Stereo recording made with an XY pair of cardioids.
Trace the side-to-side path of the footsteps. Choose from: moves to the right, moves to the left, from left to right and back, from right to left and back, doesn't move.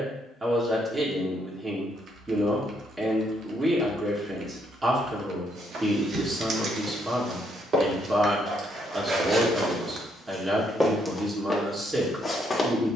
moves to the left.